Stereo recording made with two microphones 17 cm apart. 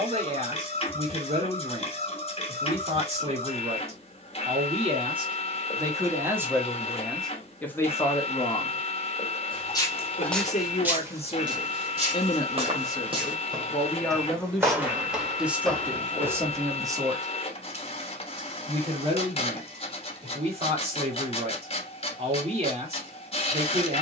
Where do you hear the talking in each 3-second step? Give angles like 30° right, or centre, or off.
40° right, 40° right, 10° left, 40° left, 10° left, 10° right, 40° right, 40° right.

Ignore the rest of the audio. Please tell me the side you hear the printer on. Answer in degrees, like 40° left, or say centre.
40° left.